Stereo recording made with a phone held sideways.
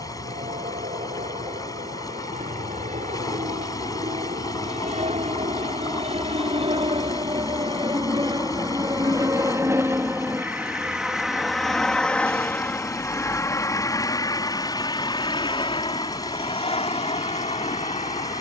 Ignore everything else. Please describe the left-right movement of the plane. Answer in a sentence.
In this clip you hear the plane move to the left.